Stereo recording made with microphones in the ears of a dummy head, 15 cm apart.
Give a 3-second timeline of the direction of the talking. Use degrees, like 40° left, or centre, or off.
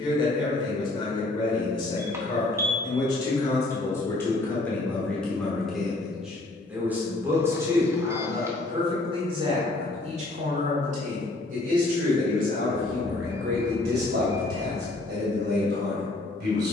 30° left, 10° left, 20° right, 40° right, 60° right, 60° right.